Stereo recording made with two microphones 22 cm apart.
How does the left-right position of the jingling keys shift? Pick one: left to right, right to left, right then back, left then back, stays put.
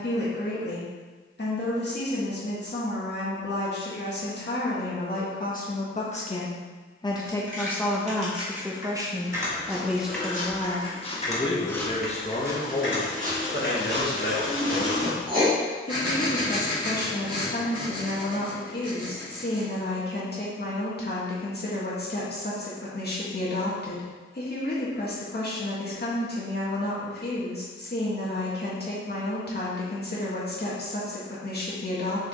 right to left.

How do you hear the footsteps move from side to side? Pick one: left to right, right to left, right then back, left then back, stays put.
left to right.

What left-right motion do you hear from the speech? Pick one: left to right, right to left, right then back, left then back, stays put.
right then back.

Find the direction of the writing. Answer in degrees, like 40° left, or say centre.
20° right.